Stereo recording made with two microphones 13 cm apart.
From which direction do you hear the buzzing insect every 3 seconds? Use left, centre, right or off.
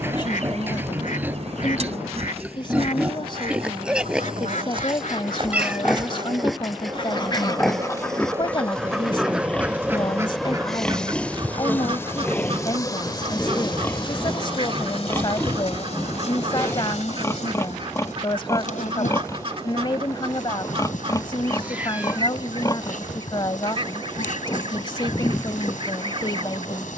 right, right, right, centre, left, left, left, left, left.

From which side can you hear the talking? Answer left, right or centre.
left.